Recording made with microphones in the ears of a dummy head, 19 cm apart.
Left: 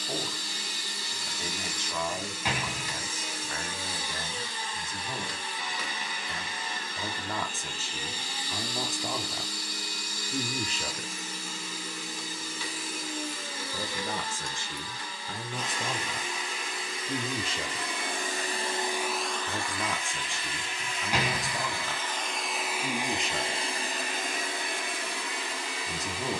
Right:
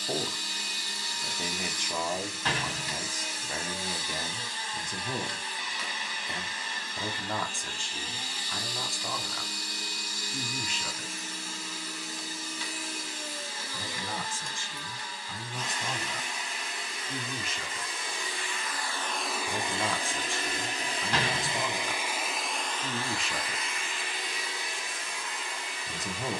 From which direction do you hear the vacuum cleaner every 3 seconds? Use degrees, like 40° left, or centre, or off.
70° left, 70° left, 70° left, 70° left, 70° left, 60° left, centre, centre, 50° left.